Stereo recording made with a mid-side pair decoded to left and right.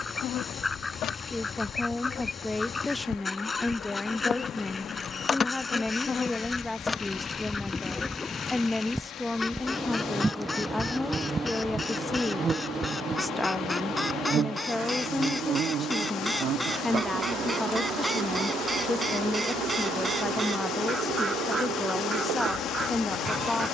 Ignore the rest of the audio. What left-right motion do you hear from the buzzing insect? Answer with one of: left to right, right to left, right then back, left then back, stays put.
left to right.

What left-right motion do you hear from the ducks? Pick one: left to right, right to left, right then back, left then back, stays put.
left to right.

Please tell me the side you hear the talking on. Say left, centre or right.
centre.